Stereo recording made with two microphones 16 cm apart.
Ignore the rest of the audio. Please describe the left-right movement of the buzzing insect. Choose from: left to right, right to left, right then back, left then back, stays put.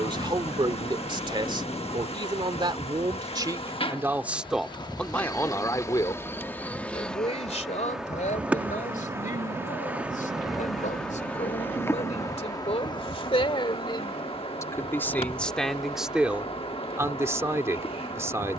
right then back.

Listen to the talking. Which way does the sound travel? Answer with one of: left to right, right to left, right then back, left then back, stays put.
left then back.